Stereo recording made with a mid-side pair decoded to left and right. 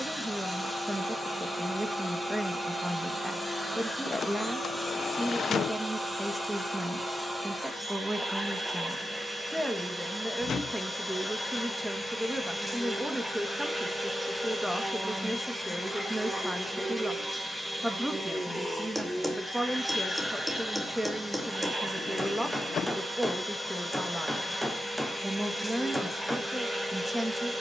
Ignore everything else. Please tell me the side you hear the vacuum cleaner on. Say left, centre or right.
centre.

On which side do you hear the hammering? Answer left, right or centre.
centre.